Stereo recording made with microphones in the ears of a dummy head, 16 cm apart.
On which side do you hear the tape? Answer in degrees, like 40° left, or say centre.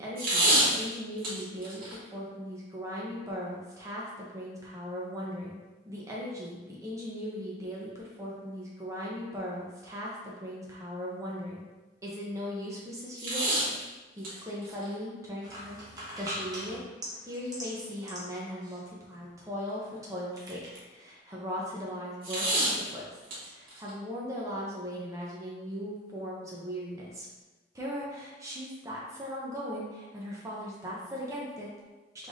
50° right.